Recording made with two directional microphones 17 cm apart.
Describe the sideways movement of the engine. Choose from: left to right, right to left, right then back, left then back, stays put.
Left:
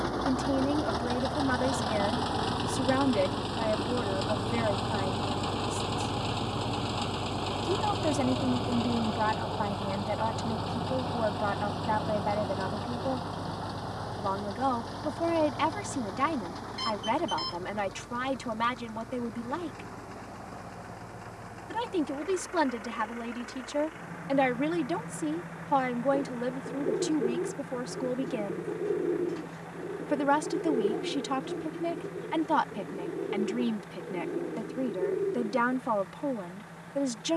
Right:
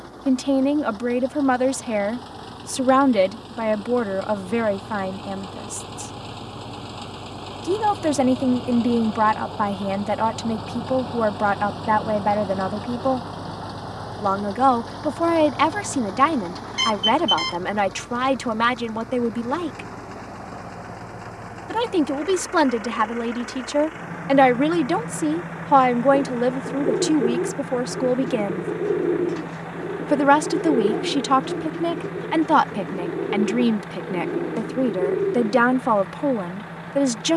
left to right.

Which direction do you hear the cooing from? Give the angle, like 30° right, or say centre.
50° right.